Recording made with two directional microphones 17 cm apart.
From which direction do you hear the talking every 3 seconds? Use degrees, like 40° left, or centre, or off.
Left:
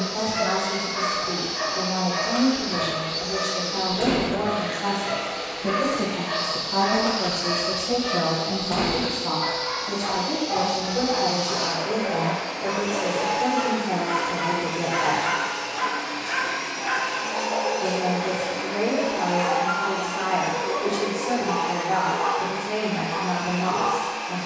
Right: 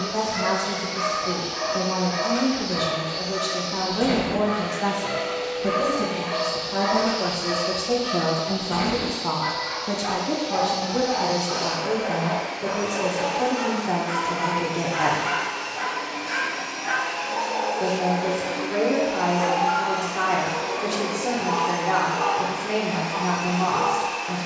70° right, 30° right, centre, 40° right, 60° right, 60° right, 60° right, 60° right.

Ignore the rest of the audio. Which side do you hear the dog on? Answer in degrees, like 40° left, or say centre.
30° left.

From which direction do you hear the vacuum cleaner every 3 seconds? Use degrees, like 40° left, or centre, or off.
60° left, 60° left, 60° left, 60° left, 60° left, 60° left, 10° left, 30° right.